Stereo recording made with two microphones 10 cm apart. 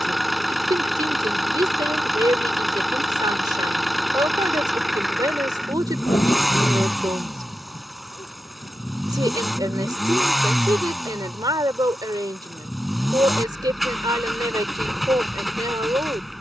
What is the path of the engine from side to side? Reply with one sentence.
You can hear the engine stay in one place.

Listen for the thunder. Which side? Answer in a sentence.
In this clip you hear the thunder on the left.